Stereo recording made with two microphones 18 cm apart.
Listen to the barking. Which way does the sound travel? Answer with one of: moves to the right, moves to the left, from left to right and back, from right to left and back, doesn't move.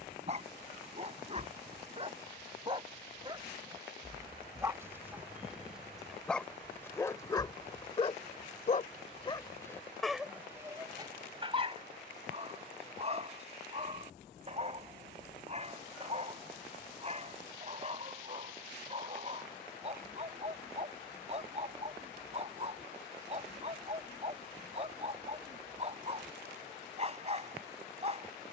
from right to left and back.